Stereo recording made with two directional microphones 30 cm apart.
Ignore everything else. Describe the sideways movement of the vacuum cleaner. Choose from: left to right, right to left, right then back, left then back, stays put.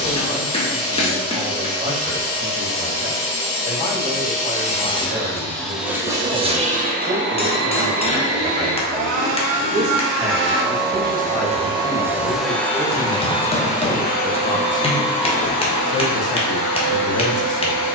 right then back.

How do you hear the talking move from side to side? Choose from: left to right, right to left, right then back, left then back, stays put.
right to left.